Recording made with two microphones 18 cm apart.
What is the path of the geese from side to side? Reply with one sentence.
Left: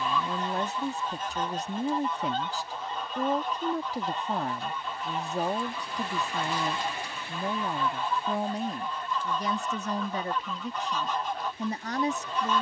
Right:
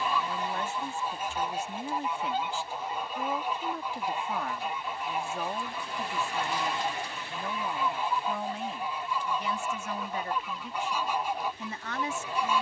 In this clip you hear the geese stay put.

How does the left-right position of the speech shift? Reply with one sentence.
You can hear the speech stay put.